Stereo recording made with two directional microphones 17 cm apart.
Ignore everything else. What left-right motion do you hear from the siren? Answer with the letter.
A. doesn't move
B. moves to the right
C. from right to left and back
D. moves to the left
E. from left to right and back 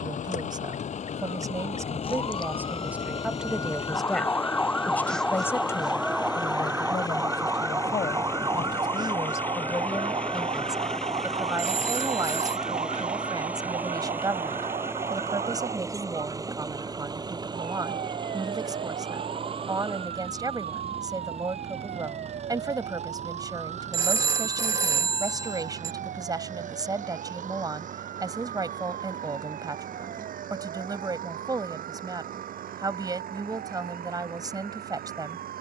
B.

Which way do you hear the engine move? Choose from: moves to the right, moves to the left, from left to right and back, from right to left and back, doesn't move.
moves to the right.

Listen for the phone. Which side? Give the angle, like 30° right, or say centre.
20° right.